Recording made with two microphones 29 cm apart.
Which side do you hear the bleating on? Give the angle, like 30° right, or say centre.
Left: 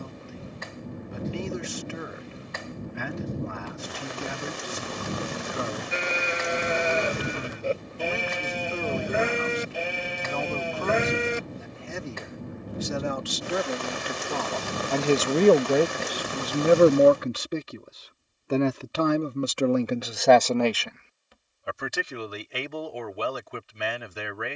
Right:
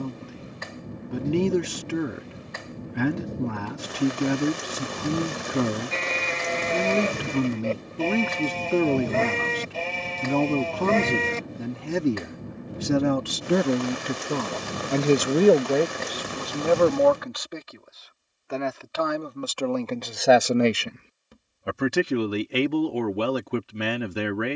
10° left.